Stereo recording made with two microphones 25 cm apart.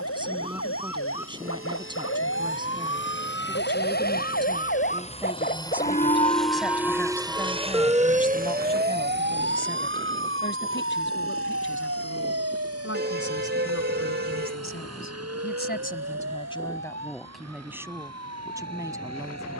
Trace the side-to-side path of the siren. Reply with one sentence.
You can hear the siren go from the left side to the right.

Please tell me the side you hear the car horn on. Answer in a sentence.
You can hear the car horn on the right.